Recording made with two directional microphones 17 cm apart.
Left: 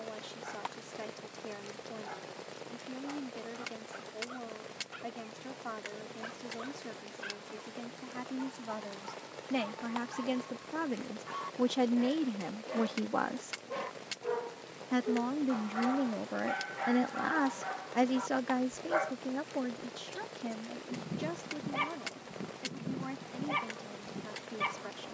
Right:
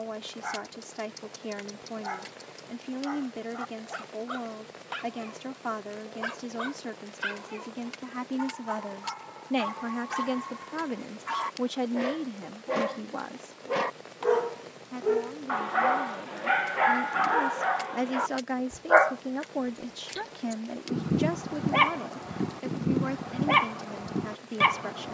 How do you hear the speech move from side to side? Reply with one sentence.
You can hear the speech move from right to left and back again.